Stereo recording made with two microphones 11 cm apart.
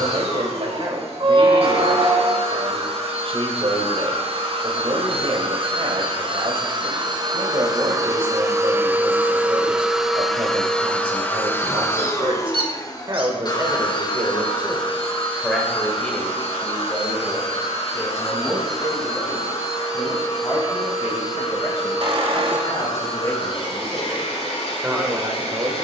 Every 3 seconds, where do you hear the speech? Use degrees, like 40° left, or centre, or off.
60° right, 60° right, 60° right, 60° right, 30° right, 20° left, 40° left, 40° left, 20° right.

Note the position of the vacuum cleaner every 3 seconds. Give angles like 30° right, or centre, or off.
70° right, 60° right, 40° right, centre, 40° left, 60° left, 60° left, 70° left, 70° left.